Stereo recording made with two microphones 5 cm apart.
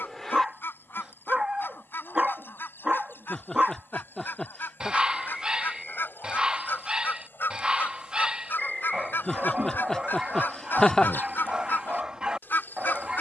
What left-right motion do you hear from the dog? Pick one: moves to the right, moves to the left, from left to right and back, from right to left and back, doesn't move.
doesn't move.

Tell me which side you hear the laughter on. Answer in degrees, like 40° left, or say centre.
10° left.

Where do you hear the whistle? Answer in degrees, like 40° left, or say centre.
centre.